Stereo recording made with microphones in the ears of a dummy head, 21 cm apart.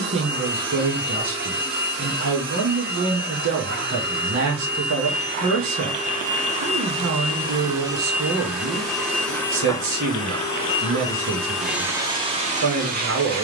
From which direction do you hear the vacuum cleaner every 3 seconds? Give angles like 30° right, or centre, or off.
50° right, 50° right, 20° right, 10° left, 30° right.